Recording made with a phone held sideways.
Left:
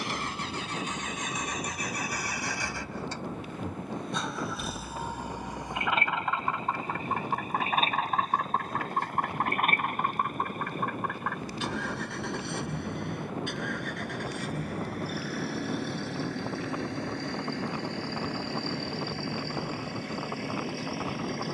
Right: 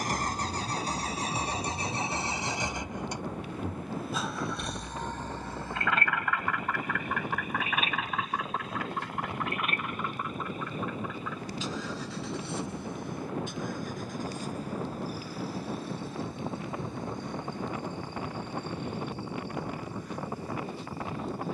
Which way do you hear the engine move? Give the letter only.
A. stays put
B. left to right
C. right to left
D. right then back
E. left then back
C.